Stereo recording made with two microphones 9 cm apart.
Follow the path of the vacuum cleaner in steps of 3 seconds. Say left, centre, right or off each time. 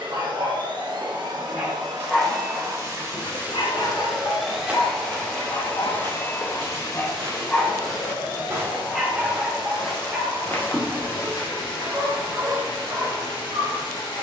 right, centre, left, left, left.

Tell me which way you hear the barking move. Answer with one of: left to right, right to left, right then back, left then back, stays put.
left then back.